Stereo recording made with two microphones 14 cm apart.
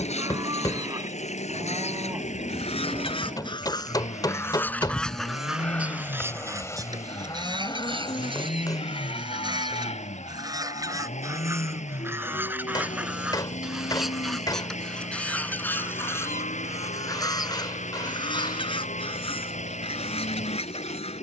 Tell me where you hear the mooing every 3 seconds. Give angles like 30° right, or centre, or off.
20° right, centre, 30° left, 60° left, 70° left, 80° left, 80° left.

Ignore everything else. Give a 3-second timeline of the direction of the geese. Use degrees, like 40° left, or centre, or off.
50° left, 20° left, 30° right, 30° right, 10° right, 20° left, 40° left.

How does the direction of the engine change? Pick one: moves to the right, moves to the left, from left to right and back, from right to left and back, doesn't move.
doesn't move.